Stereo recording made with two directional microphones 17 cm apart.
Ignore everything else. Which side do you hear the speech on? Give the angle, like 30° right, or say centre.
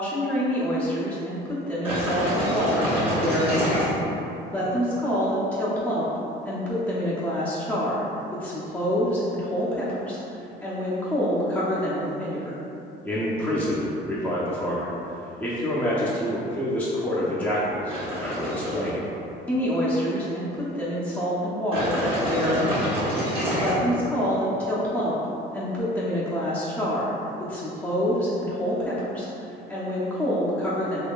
10° left.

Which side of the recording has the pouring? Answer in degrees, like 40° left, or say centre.
30° right.